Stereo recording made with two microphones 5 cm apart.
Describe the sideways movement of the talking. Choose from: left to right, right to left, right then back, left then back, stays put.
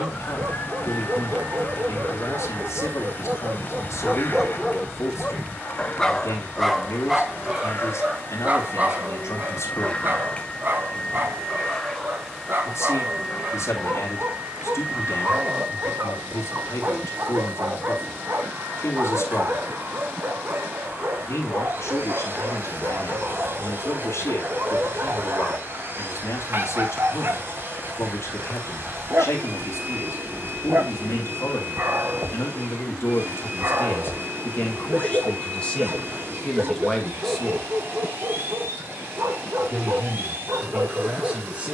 left to right.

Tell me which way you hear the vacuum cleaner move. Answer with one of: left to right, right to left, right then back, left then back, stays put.
left to right.